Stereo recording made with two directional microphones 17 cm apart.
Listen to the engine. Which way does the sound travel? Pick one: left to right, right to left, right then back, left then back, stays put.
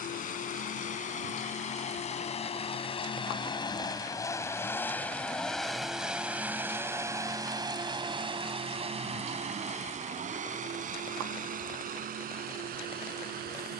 left to right.